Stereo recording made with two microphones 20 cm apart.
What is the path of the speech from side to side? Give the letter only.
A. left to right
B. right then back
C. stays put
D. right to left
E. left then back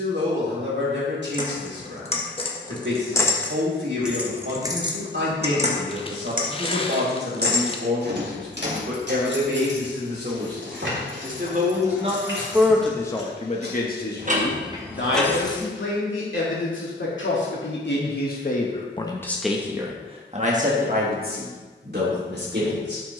E.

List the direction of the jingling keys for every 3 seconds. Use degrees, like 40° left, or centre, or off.
30° left, 20° right, 50° right, 70° right, 50° right, 10° left, off, off.